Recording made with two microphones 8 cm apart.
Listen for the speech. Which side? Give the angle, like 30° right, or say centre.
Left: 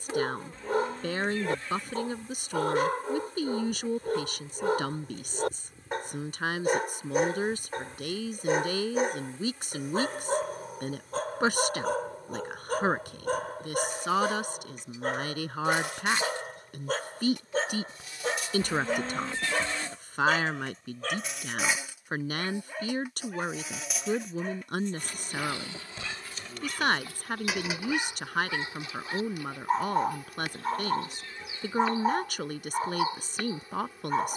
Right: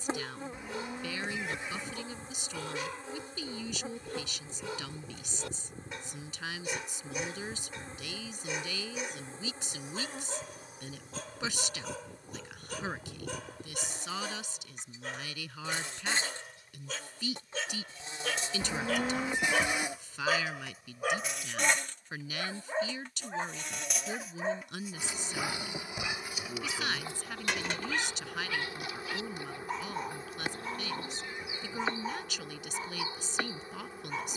50° left.